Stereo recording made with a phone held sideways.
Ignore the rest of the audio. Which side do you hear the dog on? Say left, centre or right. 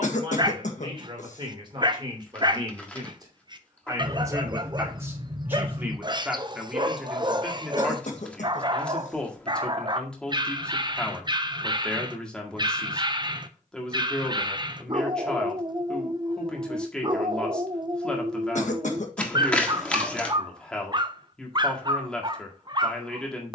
right.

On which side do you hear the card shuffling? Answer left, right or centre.
centre.